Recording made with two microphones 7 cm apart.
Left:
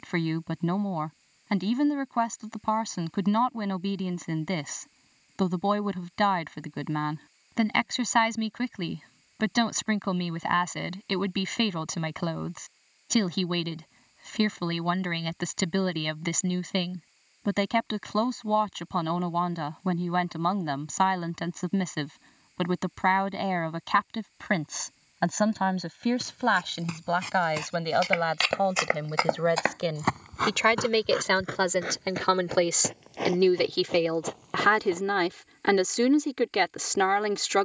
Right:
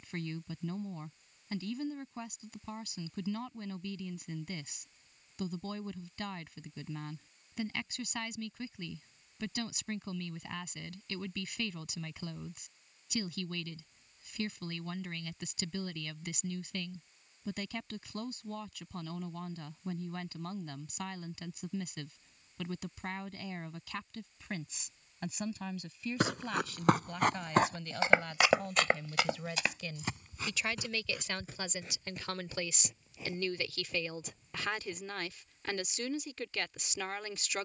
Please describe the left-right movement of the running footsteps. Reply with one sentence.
You can hear the running footsteps travel towards the left.